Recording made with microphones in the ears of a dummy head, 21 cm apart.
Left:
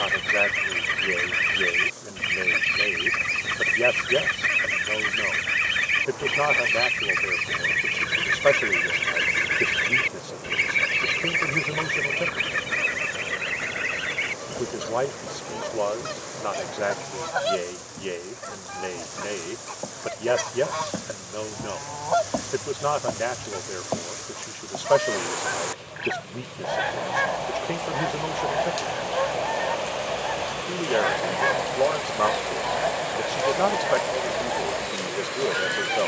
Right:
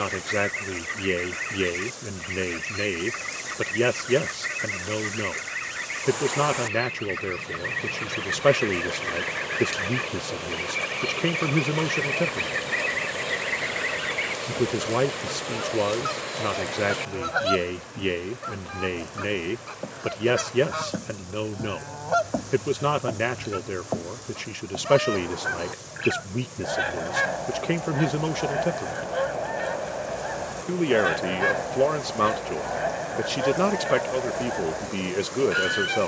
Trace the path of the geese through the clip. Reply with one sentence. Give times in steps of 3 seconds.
You can hear the geese on the left from 0 s and in the centre from 12 s.